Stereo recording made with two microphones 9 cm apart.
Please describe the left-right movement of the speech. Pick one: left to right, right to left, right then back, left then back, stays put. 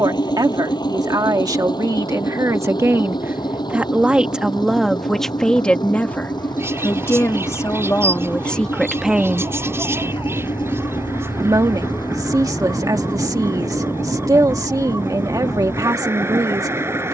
left then back.